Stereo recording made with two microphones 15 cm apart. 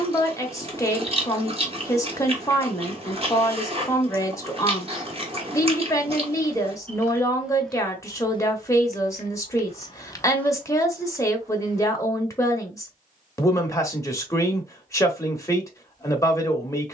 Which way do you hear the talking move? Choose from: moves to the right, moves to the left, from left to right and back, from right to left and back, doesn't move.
doesn't move.